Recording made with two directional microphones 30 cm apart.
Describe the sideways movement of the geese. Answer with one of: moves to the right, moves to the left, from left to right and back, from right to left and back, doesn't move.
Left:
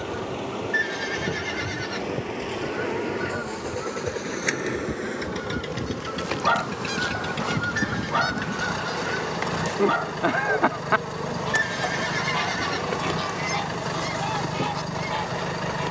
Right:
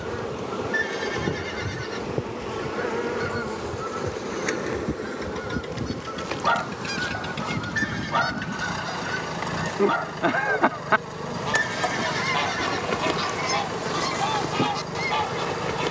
from right to left and back.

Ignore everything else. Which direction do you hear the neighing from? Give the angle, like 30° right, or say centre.
10° left.